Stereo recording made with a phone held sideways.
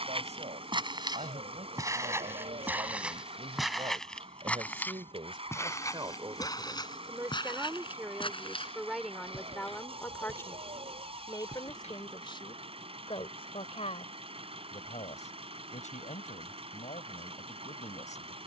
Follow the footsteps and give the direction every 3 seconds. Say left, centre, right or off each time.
right, centre, left, left, off, off.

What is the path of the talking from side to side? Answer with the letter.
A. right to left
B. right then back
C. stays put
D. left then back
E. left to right
A.